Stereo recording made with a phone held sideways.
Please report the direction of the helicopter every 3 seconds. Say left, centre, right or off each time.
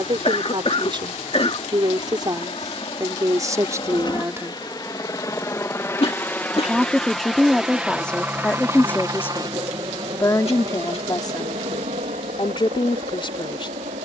left, left, centre, right, right.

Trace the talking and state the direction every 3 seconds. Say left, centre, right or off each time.
right, right, centre, left, left.